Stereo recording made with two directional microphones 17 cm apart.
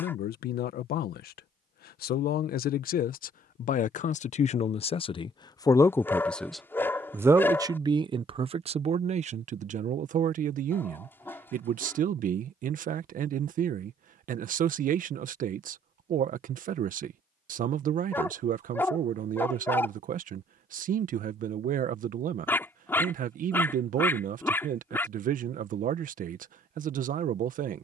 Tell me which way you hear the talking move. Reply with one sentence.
You can hear the talking move from left to right.